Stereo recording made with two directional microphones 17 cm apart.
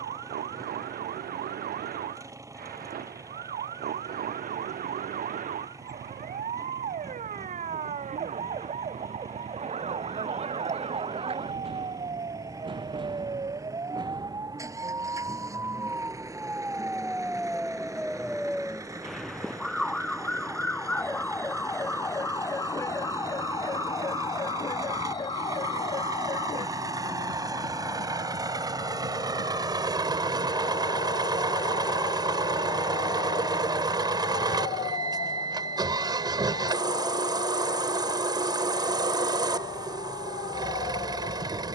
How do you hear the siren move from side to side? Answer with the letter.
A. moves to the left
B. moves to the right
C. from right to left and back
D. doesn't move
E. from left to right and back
A.